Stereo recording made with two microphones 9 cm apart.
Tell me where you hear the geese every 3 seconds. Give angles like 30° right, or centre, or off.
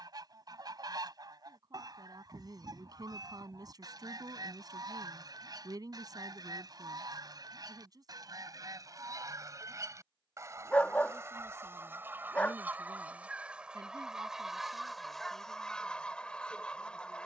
40° right, 40° right, 40° right, 30° right, 10° right, 10° left.